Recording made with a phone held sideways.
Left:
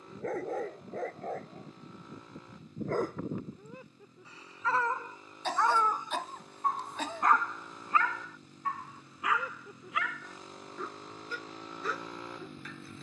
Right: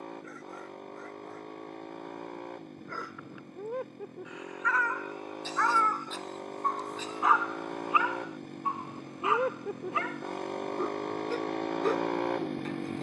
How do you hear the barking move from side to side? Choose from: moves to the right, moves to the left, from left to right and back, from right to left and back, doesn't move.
moves to the right.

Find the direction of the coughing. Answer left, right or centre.
left.